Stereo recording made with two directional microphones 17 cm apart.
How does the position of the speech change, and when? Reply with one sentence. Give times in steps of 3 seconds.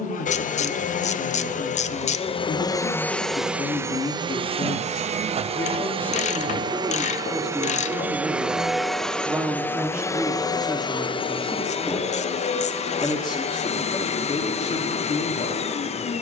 In this clip you hear the speech on the left from 0 s, in the centre from 6 s and on the left from 12 s.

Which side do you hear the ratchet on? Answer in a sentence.
You can hear the ratchet on the left.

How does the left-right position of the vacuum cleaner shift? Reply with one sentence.
In this clip you hear the vacuum cleaner move from left to right and back again.